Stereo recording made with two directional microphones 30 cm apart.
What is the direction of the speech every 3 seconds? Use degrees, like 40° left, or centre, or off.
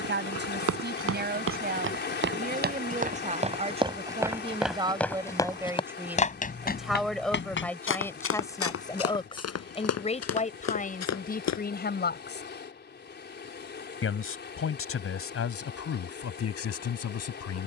30° right, 20° right, centre, 20° left, 40° left, 50° left.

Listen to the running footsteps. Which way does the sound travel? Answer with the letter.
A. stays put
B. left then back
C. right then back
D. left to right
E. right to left
E.